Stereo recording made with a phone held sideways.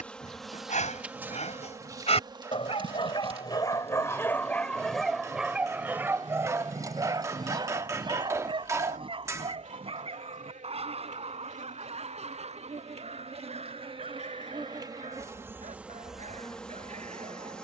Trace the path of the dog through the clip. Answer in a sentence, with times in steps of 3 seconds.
In this clip you hear the dog on the left from 0 s, in the centre from 3 s and on the right from 6 s.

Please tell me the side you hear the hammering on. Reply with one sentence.
In this clip you hear the hammering on the right.